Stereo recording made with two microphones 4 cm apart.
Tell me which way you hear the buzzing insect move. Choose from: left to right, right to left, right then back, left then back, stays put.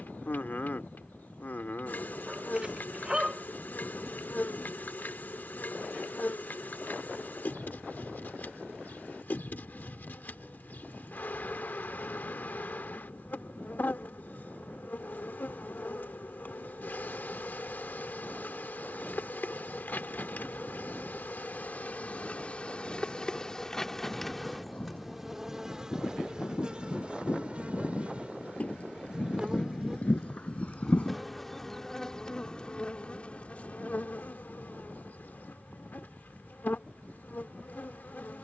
right then back.